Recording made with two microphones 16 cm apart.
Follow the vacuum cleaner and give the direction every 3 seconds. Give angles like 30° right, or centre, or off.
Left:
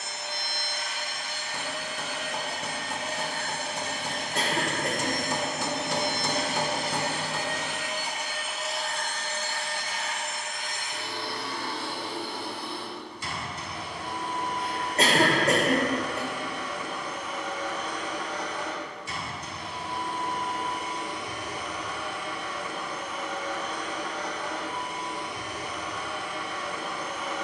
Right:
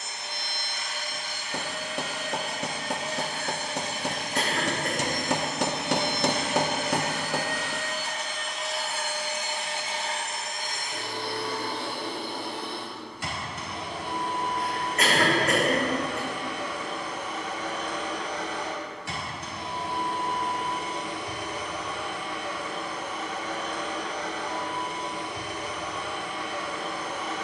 60° left, 50° left, 20° left, 40° right, 70° right, 70° right, 70° right, 70° right, 70° right.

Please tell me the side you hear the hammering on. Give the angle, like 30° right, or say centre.
70° right.